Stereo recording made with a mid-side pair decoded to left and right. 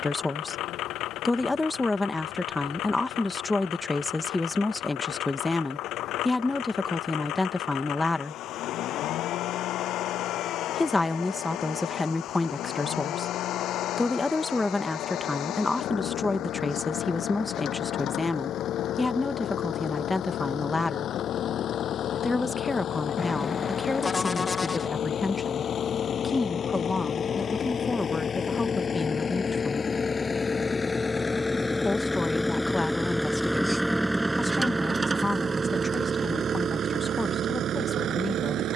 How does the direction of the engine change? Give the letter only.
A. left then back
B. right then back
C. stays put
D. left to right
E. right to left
D.